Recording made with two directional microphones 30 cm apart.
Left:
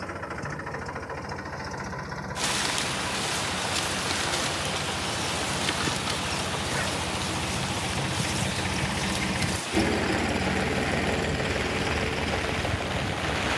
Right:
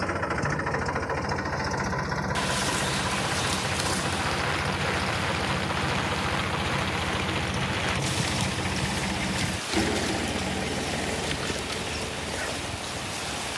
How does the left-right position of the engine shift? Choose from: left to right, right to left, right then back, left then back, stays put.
right to left.